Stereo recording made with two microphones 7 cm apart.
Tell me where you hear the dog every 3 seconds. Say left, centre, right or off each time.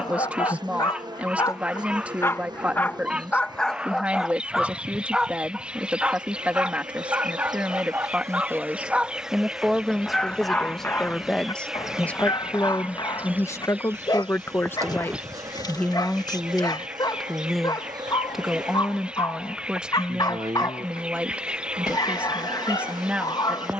left, centre, right, left, left, left, left, left.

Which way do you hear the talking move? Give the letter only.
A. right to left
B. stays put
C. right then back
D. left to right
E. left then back
E.